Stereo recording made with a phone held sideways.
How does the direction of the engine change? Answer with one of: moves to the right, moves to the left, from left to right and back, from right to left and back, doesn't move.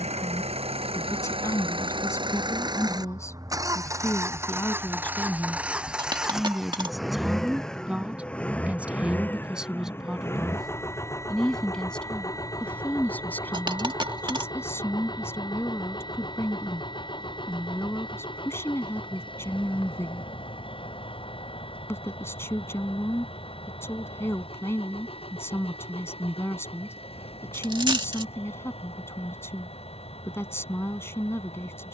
moves to the left.